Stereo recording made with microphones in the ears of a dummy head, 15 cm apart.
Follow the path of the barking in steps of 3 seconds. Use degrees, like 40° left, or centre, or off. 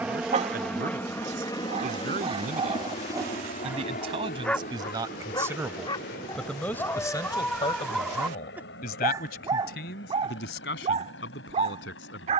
40° right, centre, 10° left, 30° right.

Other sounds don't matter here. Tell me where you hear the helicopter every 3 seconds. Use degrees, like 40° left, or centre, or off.
20° left, 50° left, 70° left, 70° left.